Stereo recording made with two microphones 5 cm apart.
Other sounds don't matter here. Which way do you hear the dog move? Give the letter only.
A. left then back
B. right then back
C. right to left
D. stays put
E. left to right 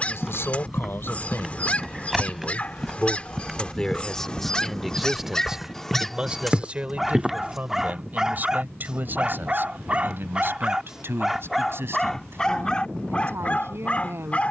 B.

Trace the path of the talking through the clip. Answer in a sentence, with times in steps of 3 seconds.
You can hear the talking on the left from 0 s, in the centre from 3 s and on the right from 6 s.